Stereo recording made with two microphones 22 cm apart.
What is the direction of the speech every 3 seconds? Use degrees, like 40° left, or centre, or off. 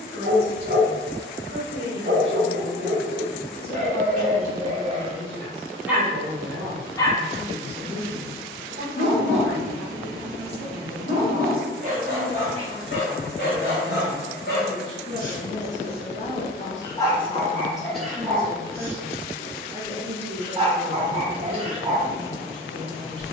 50° right, 50° right, 50° right, 50° right, 10° right, 30° left, 20° right, 50° right.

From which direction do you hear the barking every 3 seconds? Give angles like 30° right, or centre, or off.
40° right, 30° right, 30° left, 60° left, 50° left, 20° left, 20° right, 30° right.